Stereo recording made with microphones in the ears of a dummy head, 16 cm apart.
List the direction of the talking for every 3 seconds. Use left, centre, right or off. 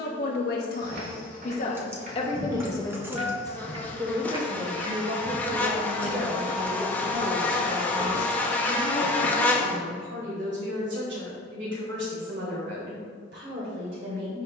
left, right, right, right, right.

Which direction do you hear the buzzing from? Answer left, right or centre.
centre.